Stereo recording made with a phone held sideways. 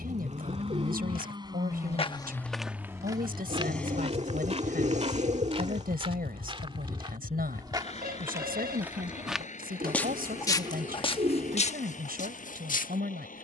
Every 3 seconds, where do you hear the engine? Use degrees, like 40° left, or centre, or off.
30° right, 20° left, 40° left, 60° left, 60° left.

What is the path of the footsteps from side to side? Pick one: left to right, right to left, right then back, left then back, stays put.
right then back.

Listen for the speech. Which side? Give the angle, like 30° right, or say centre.
80° right.